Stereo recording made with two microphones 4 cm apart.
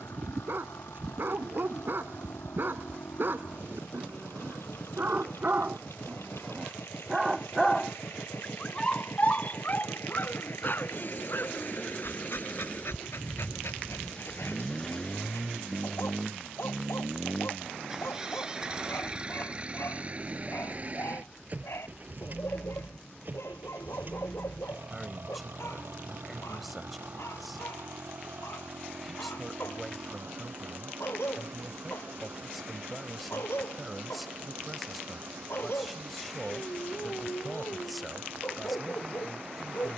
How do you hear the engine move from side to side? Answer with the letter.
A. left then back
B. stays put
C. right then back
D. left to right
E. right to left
D.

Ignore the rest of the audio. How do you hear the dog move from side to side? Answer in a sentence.
You can hear the dog go from the right side to the left.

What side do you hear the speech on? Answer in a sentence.
You can hear the speech in the centre.